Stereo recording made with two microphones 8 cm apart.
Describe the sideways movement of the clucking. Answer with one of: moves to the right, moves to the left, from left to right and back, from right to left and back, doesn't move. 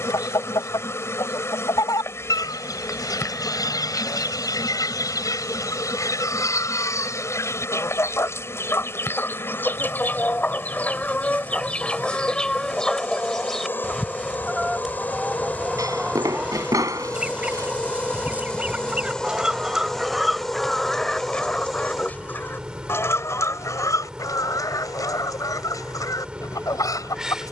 from left to right and back.